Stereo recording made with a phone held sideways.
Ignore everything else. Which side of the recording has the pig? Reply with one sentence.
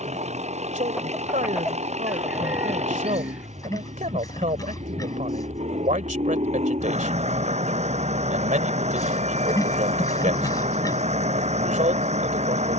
You can hear the pig on the left.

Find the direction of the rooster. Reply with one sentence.
In this clip you hear the rooster in the centre.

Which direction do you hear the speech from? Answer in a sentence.
You can hear the speech on the right.